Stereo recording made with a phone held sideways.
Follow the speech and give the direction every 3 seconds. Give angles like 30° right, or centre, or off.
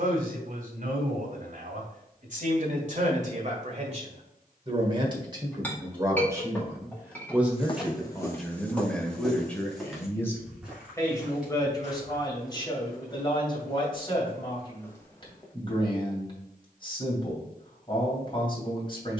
60° right, 40° right, 10° right, 20° left, 30° left, 30° left, 30° left.